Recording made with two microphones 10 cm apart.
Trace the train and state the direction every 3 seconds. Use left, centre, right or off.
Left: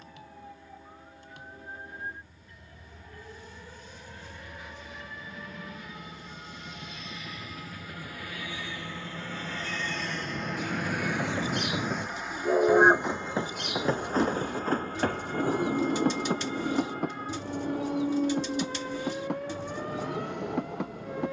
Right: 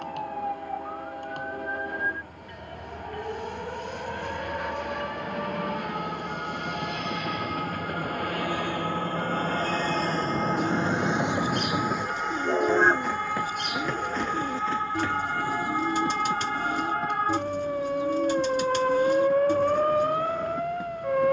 right, right, right, right, left, left, left.